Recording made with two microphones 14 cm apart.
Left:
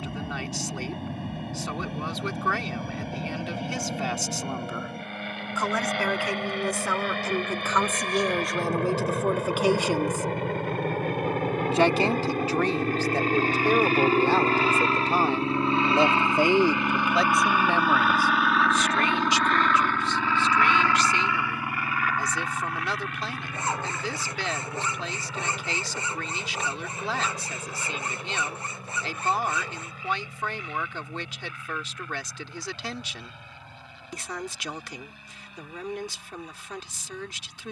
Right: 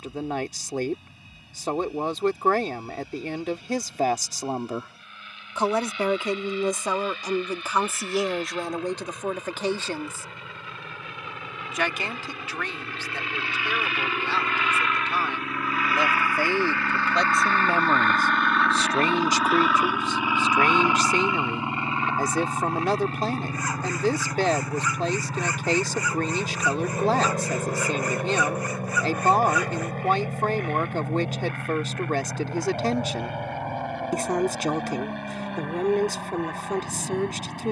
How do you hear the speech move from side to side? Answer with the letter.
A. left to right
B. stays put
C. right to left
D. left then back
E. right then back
D.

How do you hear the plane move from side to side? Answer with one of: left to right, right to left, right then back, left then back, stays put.
left to right.